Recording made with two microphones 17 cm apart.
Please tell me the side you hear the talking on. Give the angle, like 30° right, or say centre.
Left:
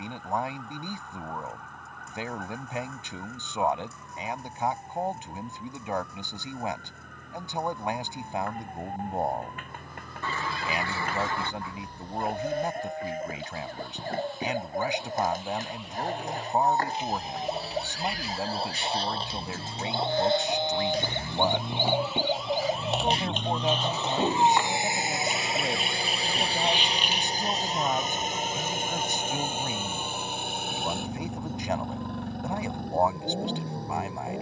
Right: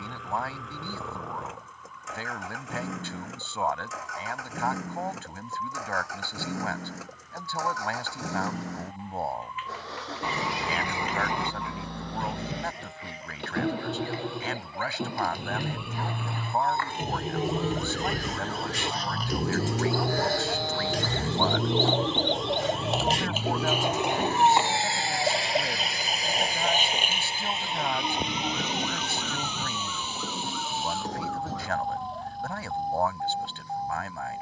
20° left.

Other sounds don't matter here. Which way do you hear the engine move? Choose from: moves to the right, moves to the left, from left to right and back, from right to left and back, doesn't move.
moves to the left.